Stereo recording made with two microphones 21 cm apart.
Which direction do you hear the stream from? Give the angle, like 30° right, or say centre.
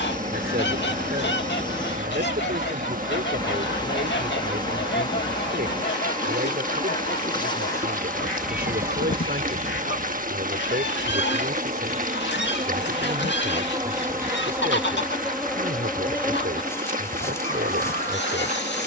40° right.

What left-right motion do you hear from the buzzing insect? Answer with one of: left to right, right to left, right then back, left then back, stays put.
right then back.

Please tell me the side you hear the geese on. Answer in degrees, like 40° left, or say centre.
60° left.